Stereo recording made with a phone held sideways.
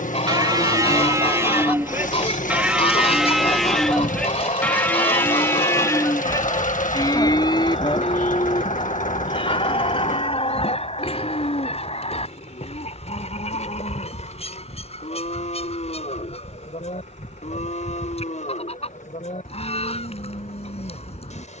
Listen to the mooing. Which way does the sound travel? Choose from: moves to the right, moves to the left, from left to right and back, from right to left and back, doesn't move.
moves to the left.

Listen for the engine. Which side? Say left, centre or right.
left.